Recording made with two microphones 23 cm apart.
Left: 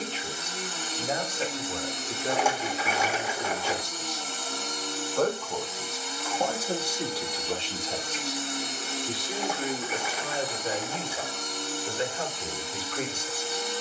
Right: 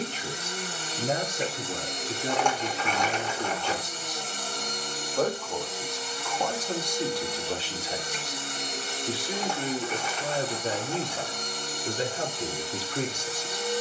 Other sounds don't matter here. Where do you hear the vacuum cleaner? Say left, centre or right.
right.